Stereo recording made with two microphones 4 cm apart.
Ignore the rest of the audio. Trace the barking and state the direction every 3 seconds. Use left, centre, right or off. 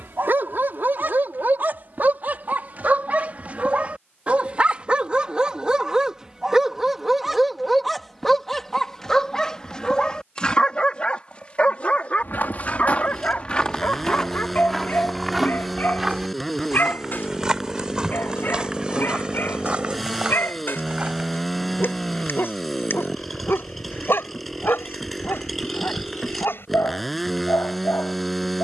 right, right, centre, left, left, left, left, left, left, left.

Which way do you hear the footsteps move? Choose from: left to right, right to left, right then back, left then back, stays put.
left to right.